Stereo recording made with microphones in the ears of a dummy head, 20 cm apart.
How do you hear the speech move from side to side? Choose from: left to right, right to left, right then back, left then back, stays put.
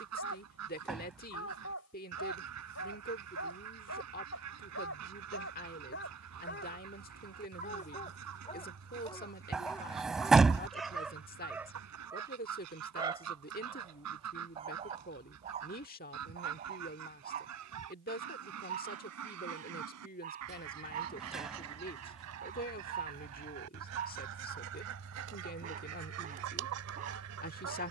stays put.